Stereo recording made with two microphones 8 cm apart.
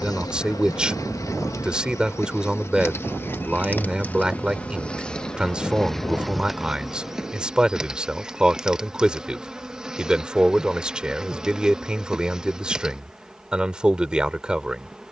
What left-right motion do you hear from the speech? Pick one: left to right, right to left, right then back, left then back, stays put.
stays put.